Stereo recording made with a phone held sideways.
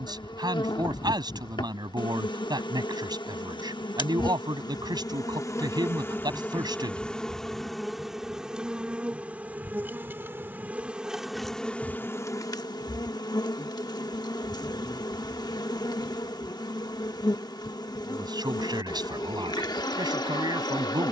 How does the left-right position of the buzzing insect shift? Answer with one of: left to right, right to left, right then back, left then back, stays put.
right then back.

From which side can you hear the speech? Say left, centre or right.
right.